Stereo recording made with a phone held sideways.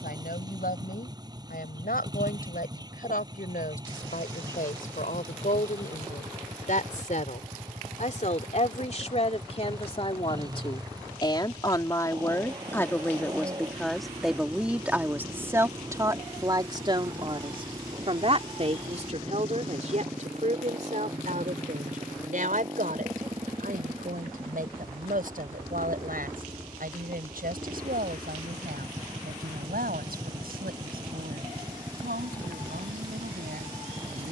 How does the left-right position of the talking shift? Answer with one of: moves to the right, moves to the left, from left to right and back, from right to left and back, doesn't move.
moves to the right.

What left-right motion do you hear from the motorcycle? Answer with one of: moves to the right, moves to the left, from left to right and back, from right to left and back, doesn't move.
doesn't move.